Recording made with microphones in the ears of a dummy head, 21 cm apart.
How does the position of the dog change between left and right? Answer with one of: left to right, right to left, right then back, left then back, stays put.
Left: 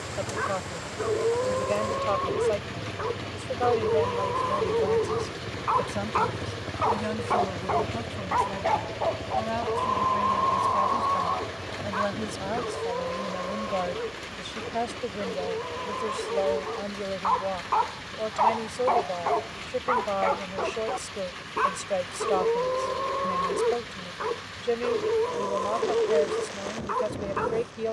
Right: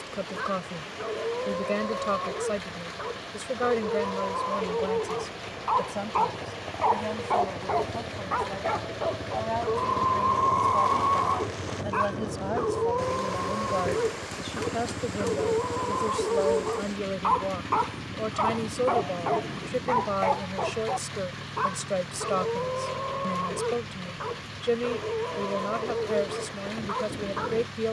right then back.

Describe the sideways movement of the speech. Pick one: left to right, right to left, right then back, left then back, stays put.
left then back.